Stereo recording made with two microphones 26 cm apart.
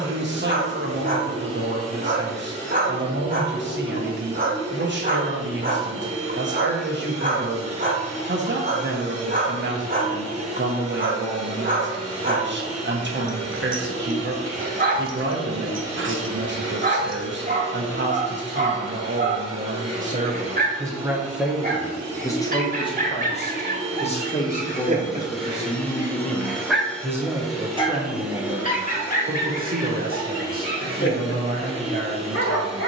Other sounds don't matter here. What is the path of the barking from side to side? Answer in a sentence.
In this clip you hear the barking go from the right side to the left.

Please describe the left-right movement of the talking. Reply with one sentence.
You can hear the talking go left and come back.